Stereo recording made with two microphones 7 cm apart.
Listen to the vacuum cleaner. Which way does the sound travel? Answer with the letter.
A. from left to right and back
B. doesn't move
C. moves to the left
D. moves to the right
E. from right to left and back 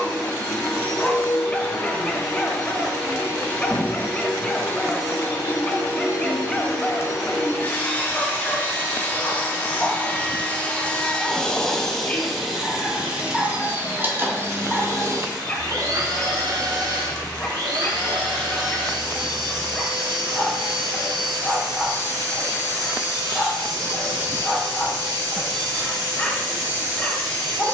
D.